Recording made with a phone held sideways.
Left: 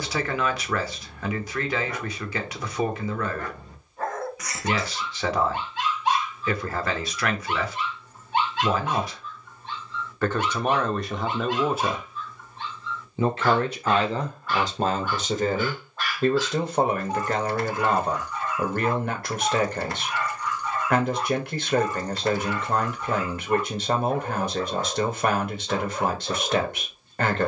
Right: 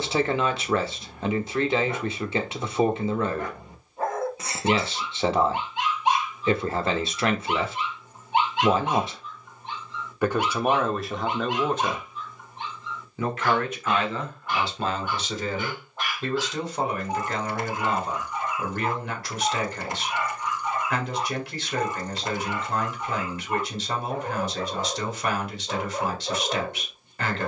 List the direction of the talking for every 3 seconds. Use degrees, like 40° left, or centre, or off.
30° right, 30° right, 30° right, 10° right, 30° left, 50° left, 50° left, 50° left, 50° left.